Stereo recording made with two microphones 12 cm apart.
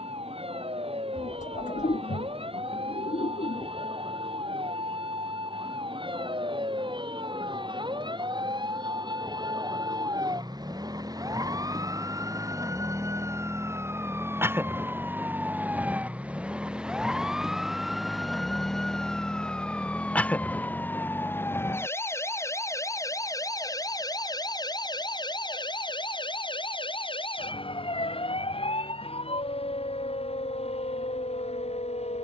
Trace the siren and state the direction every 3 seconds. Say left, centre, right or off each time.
right, right, right, right, right, centre, centre, left, left, left, left.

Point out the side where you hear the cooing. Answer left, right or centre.
left.